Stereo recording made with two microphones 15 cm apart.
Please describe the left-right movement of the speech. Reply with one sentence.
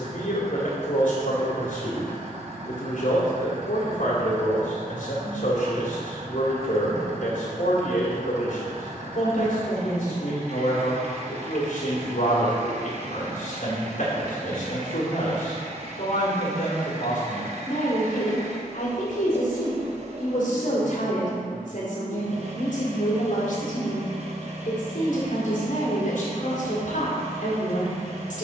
In this clip you hear the speech stay put.